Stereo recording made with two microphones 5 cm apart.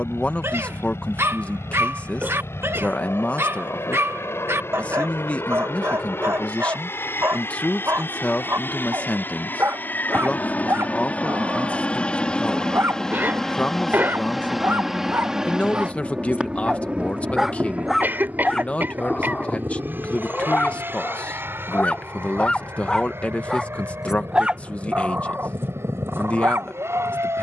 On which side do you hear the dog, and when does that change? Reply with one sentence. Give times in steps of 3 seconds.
In this clip you hear the dog on the right from 0 s, on the left from 18 s and on the right from 24 s.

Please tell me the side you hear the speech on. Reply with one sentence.
You can hear the speech on the left.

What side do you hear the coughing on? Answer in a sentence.
In this clip you hear the coughing on the right.